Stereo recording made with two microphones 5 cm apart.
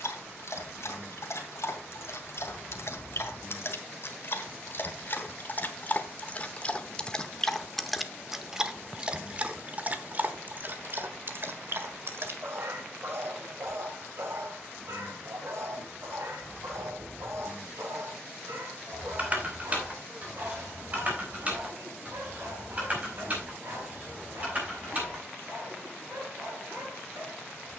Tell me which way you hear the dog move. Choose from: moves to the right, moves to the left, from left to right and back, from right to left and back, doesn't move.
moves to the right.